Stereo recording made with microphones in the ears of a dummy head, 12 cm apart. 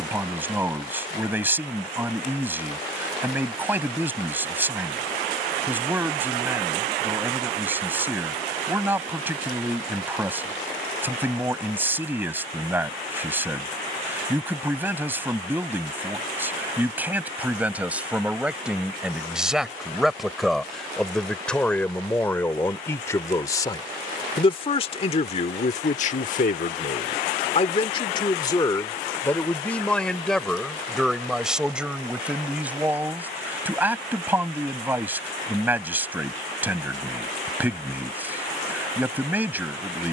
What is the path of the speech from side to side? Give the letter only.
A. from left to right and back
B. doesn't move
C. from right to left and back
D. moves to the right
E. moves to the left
C.